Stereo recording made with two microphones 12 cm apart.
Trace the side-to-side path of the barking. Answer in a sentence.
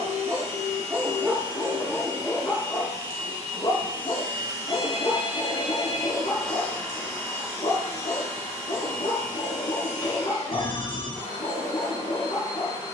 In this clip you hear the barking move to the left.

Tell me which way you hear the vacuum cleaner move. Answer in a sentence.
You can hear the vacuum cleaner move from right to left.